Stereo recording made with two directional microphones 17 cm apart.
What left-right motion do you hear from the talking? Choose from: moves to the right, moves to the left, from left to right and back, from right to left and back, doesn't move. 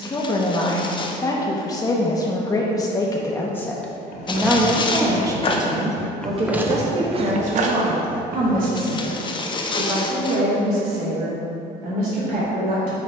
moves to the right.